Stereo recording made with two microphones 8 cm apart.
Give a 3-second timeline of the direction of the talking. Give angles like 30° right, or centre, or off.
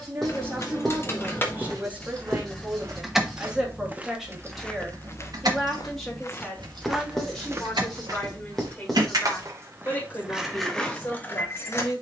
20° right, centre, 10° left, 30° left.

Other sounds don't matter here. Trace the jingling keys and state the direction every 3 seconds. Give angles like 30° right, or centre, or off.
20° left, 30° right, 70° right, 10° right.